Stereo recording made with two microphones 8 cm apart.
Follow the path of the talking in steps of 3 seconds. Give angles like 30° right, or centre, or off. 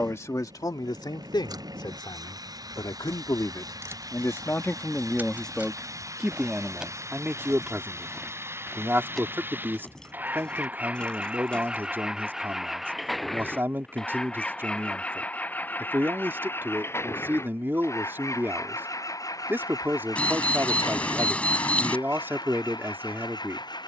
60° left, 30° left, 20° right, 30° right, 30° right, 30° right, 30° right, 30° right.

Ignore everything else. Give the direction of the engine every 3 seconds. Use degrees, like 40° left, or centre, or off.
50° right, 50° right, 40° right, 20° right, centre, 30° left, 50° left, 60° left.